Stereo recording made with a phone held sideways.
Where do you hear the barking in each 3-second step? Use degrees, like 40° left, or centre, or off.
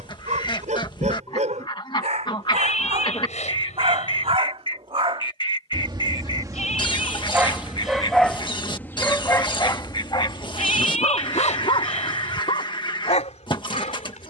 60° right, 50° right, 10° right, 40° left, 60° left.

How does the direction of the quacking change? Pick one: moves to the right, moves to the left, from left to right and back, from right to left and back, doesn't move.
doesn't move.